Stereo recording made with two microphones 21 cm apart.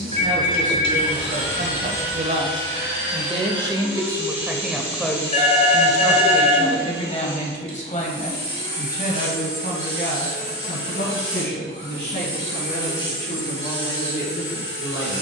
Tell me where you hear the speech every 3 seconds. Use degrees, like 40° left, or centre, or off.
50° right, 10° right, 30° left, 50° left, 60° left.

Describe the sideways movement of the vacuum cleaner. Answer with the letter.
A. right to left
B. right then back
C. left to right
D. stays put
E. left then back
D.